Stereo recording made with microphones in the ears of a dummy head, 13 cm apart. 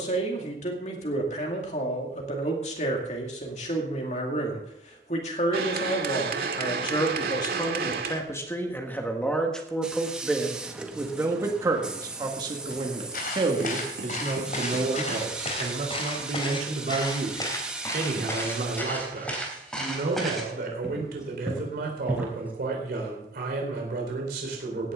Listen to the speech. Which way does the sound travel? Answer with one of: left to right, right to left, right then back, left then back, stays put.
left to right.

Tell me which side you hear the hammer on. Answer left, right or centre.
right.